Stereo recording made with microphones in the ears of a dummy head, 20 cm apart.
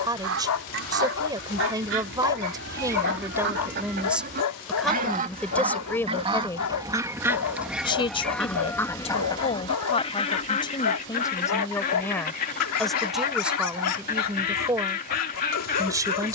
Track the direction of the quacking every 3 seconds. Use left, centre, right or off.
right, right, centre, left, left, left.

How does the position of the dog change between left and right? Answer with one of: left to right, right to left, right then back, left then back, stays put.
stays put.